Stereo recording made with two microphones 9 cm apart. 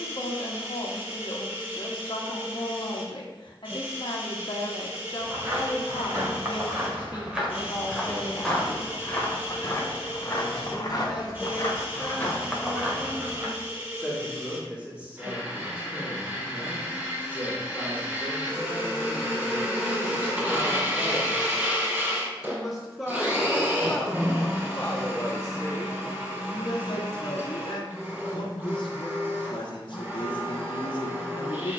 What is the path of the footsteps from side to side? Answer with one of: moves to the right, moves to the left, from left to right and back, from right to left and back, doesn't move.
from right to left and back.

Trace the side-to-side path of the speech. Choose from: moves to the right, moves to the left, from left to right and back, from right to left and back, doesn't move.
from left to right and back.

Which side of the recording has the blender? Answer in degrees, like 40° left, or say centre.
20° right.